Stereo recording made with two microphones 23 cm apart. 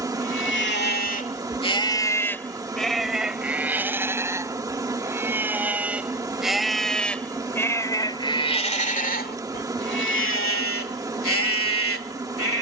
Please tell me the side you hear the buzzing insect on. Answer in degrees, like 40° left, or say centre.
20° right.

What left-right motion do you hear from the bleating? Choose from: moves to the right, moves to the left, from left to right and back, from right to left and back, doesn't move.
from left to right and back.